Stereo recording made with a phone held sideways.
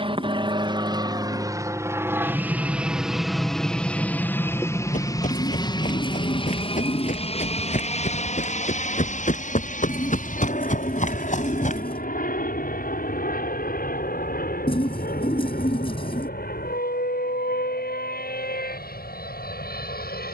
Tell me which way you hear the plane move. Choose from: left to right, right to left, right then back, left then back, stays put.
right to left.